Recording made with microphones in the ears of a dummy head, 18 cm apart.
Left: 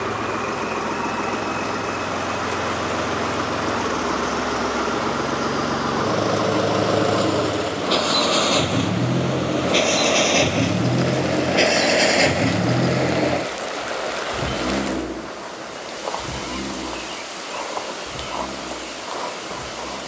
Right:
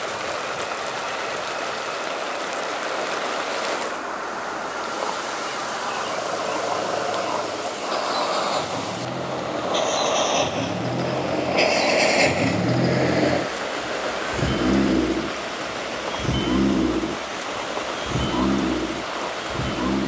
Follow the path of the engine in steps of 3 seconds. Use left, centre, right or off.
left, left, left, left, centre, right, right.